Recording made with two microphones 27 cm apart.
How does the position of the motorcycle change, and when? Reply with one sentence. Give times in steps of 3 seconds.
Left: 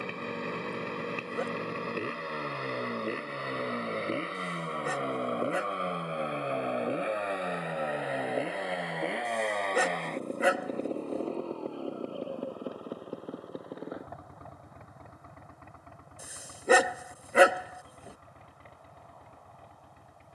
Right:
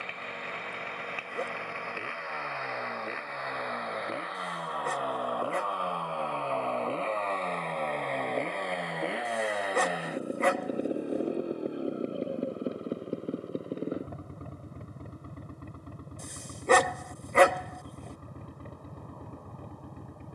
In this clip you hear the motorcycle on the left from 0 s, in the centre from 6 s and on the right from 12 s.